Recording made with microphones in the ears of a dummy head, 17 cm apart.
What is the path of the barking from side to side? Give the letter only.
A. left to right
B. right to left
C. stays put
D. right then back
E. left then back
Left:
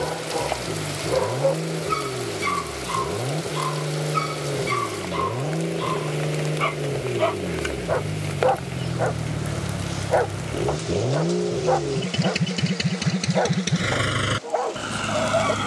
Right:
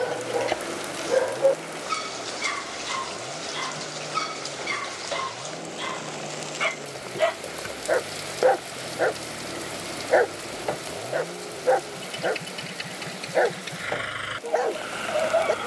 C.